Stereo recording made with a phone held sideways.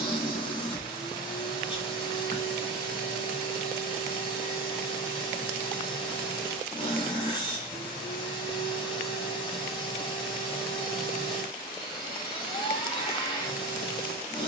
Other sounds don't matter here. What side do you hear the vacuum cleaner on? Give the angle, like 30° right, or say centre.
30° left.